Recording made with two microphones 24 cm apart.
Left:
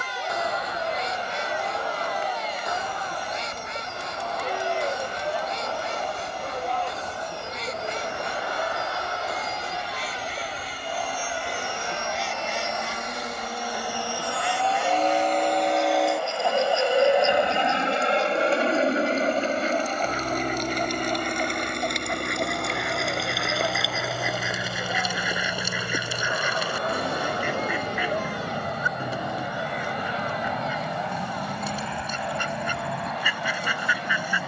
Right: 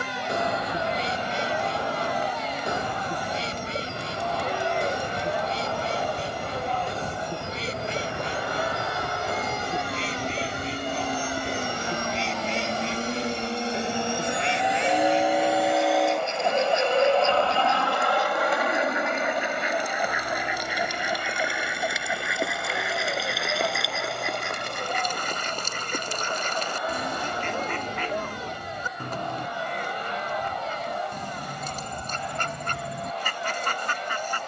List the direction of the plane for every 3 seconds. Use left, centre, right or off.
right, right, right, right, right, centre, left, left, left, left, left, left.